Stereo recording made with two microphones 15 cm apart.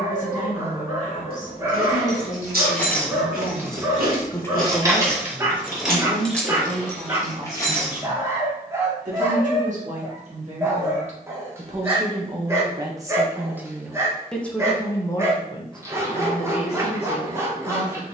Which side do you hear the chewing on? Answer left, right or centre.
right.